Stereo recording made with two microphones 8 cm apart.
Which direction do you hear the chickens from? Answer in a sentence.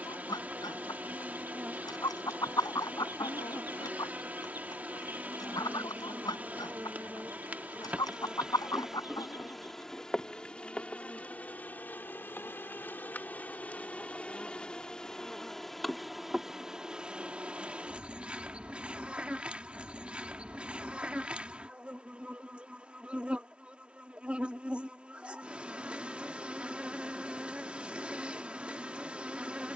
You can hear the chickens on the left.